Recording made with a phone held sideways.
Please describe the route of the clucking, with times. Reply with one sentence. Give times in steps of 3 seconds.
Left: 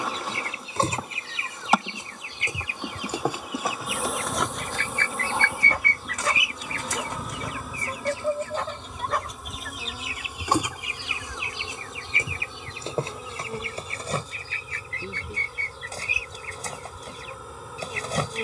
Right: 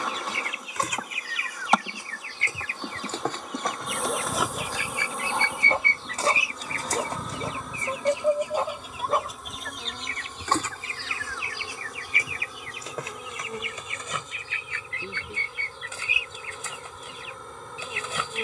You can hear the clucking on the left from 0 s, in the centre from 3 s, on the right from 6 s, in the centre from 9 s and on the left from 12 s.